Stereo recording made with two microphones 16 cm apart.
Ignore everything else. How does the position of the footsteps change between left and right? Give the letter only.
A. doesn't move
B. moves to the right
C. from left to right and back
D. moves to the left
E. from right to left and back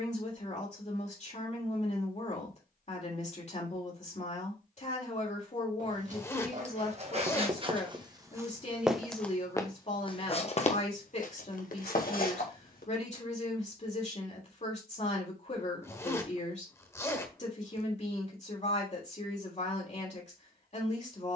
D.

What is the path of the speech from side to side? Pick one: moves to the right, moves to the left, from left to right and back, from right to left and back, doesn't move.
doesn't move.